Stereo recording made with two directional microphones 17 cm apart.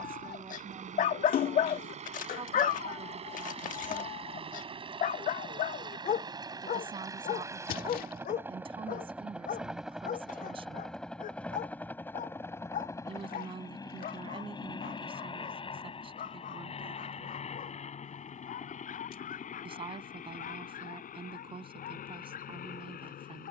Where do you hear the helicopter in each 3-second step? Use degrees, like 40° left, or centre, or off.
40° right, 30° right, 20° right, centre, 20° left, 30° left, 50° left, 50° left.